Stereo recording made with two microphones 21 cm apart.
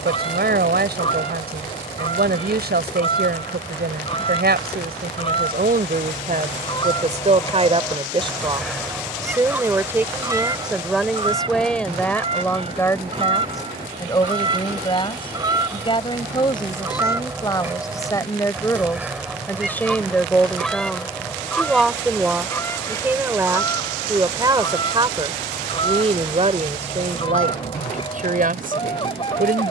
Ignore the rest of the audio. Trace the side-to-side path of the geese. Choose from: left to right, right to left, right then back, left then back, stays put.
right then back.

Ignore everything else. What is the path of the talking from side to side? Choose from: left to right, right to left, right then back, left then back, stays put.
left then back.